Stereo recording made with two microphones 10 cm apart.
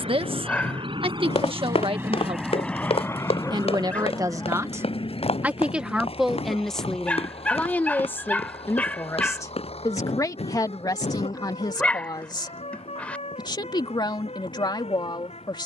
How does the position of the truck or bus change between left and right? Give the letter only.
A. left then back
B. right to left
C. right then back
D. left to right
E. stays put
B.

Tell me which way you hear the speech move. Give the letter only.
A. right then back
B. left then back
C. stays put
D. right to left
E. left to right
D.